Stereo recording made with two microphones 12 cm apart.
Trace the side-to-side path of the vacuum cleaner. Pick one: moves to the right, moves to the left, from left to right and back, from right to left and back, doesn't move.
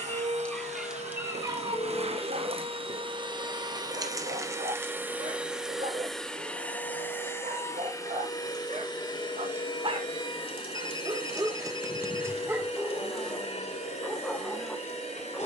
moves to the left.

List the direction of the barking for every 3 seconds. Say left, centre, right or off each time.
right, right, right, right, centre.